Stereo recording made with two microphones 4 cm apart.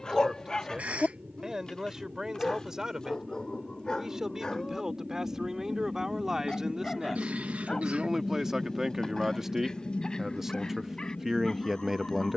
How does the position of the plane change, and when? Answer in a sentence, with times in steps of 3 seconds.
In this clip you hear the plane on the right from 0 s, in the centre from 6 s and on the left from 9 s.